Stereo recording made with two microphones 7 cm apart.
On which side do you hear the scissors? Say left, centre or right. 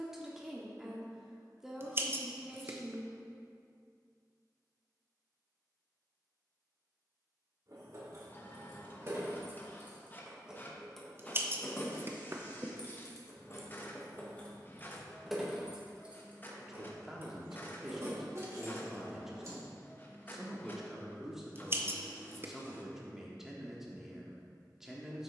right.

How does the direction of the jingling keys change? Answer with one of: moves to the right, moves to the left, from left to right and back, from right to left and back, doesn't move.
from right to left and back.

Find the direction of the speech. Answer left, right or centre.
centre.